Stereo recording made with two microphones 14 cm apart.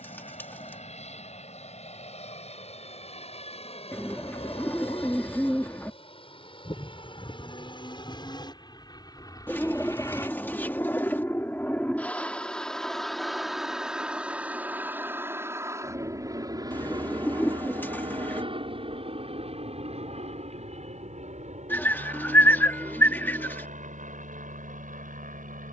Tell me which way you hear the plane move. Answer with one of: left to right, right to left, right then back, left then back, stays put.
left to right.